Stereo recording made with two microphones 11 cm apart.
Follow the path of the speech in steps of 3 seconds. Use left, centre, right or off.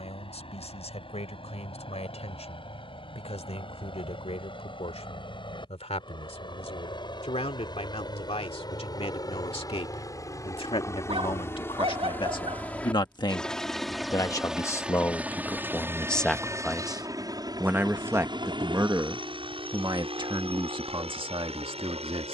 left, left, left, left, left, centre, right, right.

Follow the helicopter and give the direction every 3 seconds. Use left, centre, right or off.
left, left, left, left, centre, right, right, right.